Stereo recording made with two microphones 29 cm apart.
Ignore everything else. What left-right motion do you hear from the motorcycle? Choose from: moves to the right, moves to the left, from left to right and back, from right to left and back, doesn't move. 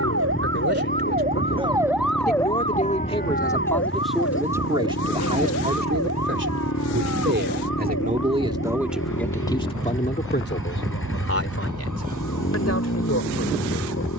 doesn't move.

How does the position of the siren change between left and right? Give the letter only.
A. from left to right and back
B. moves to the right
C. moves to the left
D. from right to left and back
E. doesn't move
C.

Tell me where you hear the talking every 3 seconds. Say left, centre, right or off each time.
left, centre, right, left, left.